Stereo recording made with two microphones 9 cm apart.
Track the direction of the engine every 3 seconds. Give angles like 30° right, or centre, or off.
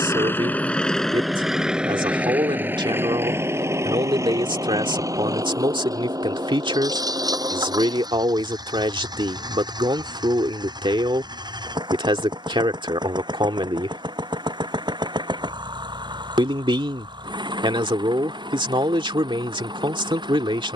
centre, 30° right, 40° right, 50° right, 50° right, 50° right, 50° right.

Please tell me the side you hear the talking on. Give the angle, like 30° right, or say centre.
60° right.